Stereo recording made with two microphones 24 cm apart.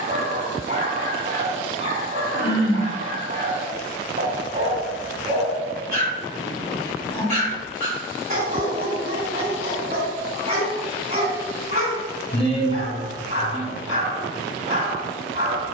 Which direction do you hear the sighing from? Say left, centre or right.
left.